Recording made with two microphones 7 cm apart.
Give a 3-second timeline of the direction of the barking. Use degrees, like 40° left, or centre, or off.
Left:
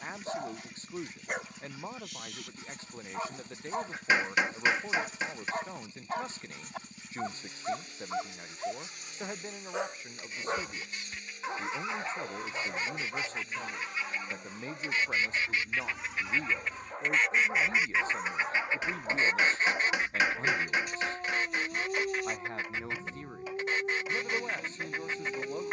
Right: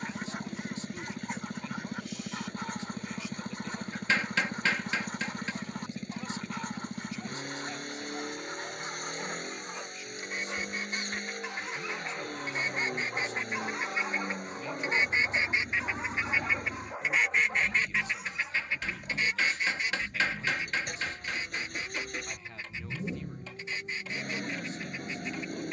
70° left, 70° left, 70° left, 40° left, 10° right, 10° right, 60° left, 70° left, 70° left.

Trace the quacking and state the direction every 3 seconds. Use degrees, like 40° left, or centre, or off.
60° right, 60° right, 60° right, 50° right, 40° right, 10° right, 40° left, 60° left, 60° left.